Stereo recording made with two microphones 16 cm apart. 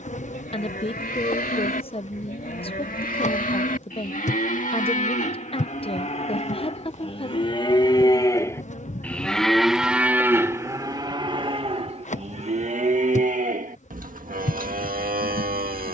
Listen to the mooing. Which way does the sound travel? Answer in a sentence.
In this clip you hear the mooing travel towards the right.